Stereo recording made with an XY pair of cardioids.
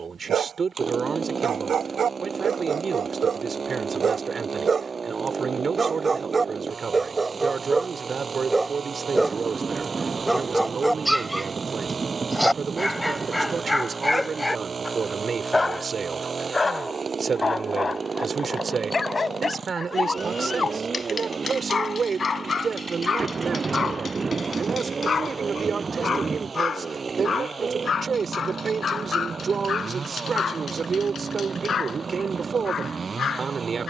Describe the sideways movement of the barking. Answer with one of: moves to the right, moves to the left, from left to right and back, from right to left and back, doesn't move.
moves to the left.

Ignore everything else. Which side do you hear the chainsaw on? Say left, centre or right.
right.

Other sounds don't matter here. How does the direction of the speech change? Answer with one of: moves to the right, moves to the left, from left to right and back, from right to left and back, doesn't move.
doesn't move.